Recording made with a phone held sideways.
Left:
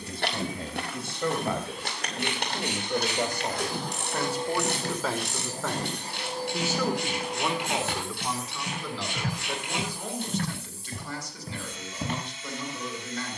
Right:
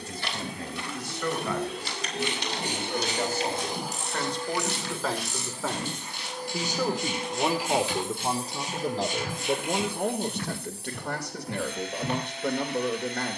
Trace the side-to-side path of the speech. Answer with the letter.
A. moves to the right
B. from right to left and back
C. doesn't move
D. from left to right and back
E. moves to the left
A.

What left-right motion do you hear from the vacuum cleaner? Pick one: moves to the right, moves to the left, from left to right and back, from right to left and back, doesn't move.
from right to left and back.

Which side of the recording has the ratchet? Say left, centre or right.
left.